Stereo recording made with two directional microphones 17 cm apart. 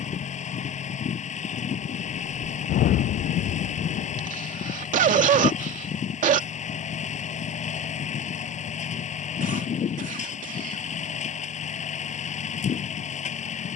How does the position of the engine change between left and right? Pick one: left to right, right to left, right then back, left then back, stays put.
stays put.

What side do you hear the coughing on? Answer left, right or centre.
right.